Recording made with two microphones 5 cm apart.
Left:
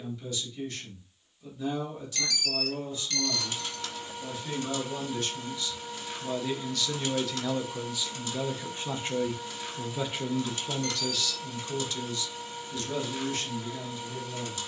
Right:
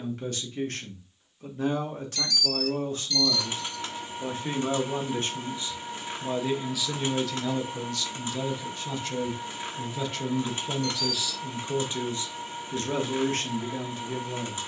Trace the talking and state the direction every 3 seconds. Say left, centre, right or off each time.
right, right, centre, centre, right.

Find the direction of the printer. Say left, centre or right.
right.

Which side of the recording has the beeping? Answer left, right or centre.
left.